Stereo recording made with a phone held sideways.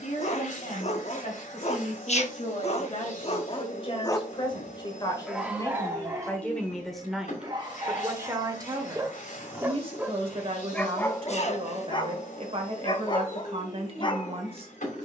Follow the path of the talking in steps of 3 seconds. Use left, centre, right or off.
left, left, centre, right, right.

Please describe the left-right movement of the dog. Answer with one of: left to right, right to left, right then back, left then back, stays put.
right then back.